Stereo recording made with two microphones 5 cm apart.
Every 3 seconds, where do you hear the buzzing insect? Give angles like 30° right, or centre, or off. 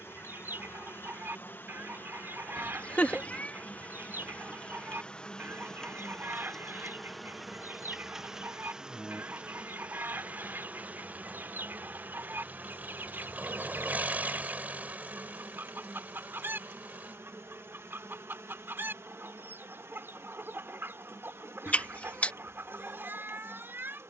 50° left, 30° left, centre, 30° right, 50° right, 60° right, 70° right, 70° right.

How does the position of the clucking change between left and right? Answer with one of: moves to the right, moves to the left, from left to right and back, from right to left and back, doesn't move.
doesn't move.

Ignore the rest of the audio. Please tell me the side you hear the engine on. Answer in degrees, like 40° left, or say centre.
40° right.